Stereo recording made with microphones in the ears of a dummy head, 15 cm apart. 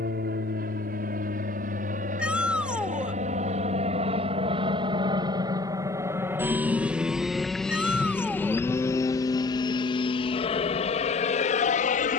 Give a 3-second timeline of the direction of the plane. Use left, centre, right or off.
right, right, centre, left.